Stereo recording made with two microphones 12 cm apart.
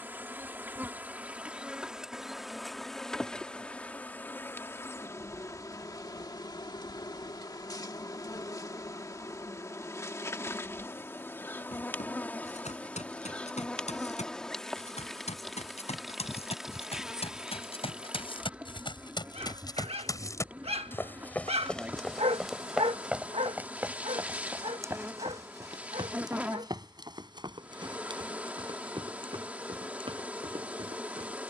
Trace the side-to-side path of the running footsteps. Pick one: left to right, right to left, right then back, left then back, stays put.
left to right.